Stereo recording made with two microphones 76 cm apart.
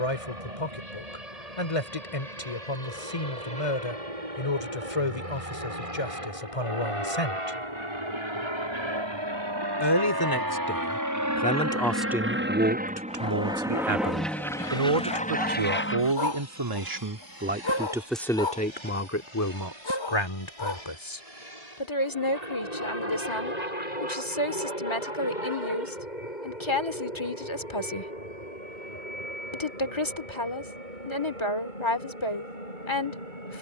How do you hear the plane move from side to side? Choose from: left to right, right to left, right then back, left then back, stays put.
right to left.